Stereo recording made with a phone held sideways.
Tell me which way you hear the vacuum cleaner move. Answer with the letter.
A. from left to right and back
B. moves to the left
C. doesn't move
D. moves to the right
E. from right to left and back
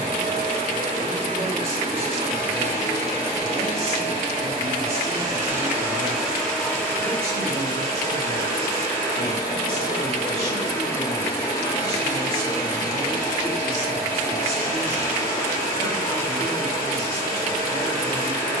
B.